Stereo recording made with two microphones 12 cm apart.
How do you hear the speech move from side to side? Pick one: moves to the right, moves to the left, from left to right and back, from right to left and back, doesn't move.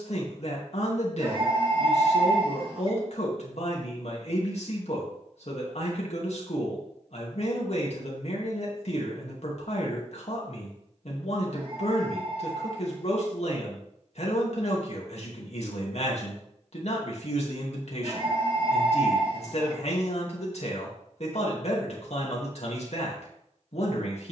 doesn't move.